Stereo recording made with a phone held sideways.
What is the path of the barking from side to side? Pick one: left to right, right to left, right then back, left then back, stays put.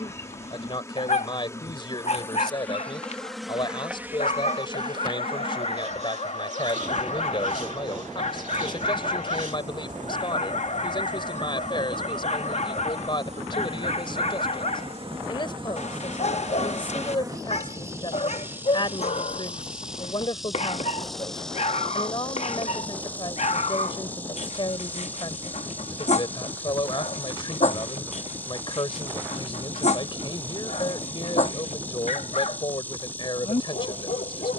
stays put.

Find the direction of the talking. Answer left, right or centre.
left.